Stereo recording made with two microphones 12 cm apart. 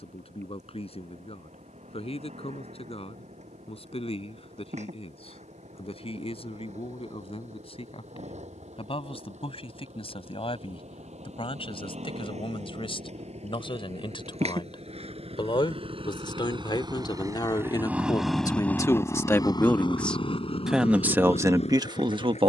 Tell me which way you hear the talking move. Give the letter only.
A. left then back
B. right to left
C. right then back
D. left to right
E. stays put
D.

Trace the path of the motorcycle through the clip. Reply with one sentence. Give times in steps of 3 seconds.
You can hear the motorcycle on the right from 0 s and on the left from 18 s.